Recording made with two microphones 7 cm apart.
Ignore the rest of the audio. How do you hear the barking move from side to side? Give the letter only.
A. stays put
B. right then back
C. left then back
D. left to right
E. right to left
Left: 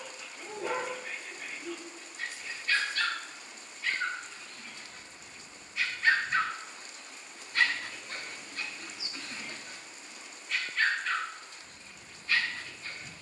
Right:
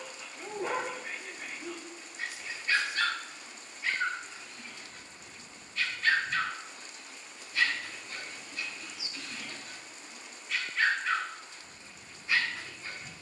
C.